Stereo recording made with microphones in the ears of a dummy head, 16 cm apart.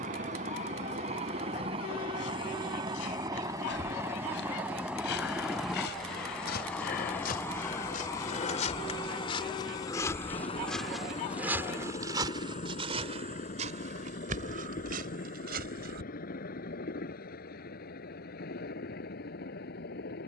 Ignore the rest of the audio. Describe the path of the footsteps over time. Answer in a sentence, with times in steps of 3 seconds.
You can hear the footsteps on the left from 0 s, in the centre from 9 s, on the right from 12 s and not at all from 18 s.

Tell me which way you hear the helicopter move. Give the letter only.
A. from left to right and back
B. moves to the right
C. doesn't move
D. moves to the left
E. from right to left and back
D.